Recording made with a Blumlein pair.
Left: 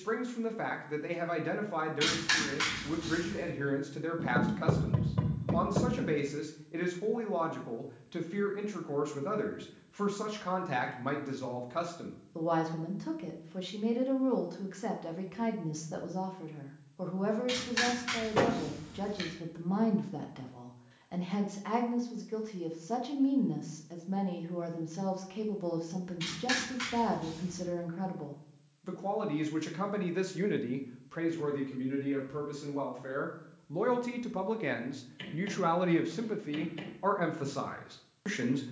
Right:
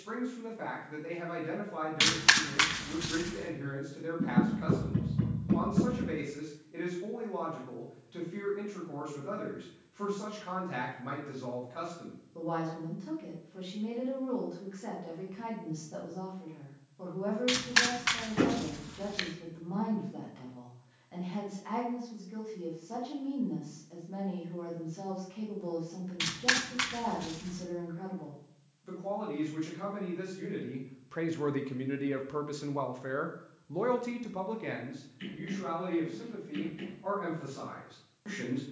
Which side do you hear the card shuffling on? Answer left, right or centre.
right.